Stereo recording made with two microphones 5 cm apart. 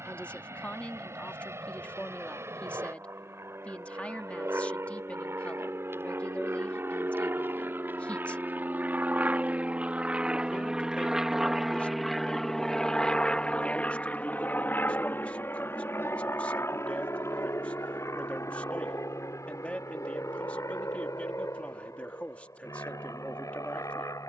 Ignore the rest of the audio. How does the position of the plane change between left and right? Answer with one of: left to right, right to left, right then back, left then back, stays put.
right to left.